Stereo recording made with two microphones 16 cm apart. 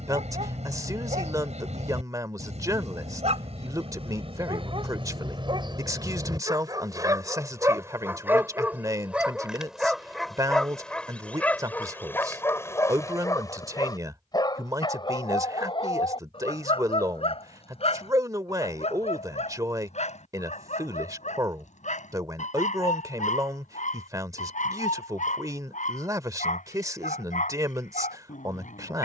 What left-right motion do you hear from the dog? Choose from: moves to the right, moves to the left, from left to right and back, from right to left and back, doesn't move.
moves to the left.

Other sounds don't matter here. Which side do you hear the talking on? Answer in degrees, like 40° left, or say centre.
20° right.